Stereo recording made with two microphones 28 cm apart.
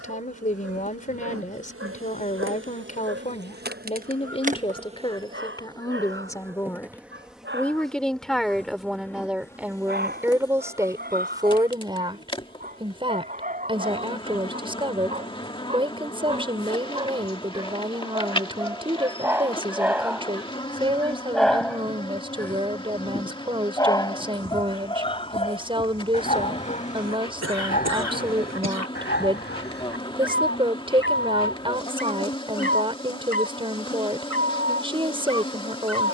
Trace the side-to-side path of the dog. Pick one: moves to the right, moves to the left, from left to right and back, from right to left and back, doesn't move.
moves to the left.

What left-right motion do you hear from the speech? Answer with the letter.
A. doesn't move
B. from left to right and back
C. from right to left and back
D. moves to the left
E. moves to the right
E.